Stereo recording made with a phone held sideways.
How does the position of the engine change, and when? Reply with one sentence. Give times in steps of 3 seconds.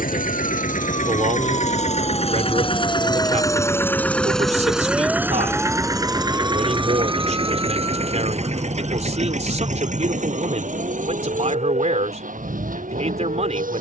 You can hear the engine on the left from 0 s, in the centre from 3 s and on the right from 6 s.